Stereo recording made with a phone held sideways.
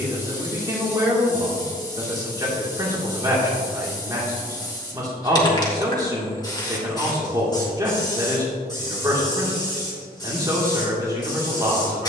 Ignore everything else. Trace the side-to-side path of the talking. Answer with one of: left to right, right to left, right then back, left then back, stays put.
stays put.